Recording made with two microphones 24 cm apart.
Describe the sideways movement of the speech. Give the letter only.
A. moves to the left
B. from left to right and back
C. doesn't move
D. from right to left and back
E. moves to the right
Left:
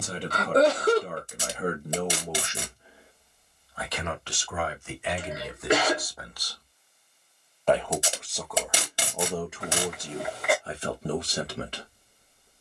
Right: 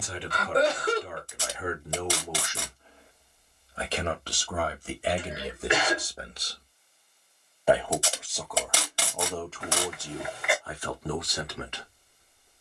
B.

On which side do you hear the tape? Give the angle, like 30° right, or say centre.
20° left.